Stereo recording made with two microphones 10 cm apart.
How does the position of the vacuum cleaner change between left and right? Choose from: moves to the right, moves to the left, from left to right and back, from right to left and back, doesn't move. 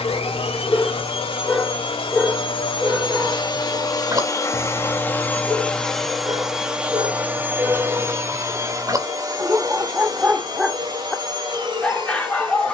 moves to the right.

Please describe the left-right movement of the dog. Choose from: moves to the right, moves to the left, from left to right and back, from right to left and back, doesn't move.
from left to right and back.